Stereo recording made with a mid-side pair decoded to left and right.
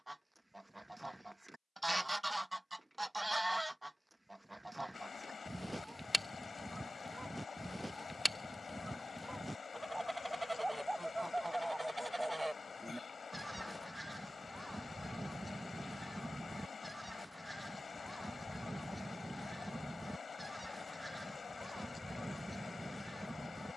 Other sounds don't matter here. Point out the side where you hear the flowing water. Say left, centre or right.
left.